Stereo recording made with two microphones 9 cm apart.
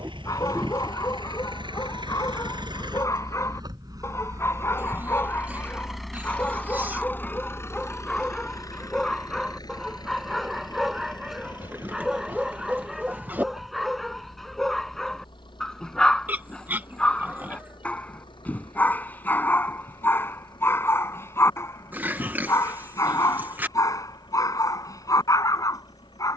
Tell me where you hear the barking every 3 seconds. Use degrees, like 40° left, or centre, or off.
40° left, 30° left, 10° left, centre, centre, 10° left, 20° left, 30° left, 40° left.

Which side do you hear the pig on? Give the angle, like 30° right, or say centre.
20° right.